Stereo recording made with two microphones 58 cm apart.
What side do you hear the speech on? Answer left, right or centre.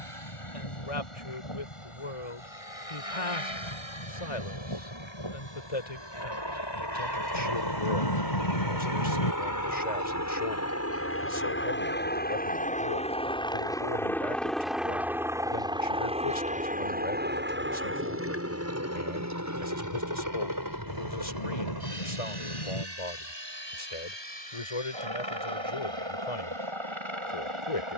left.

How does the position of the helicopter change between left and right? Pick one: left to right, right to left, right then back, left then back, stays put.
left to right.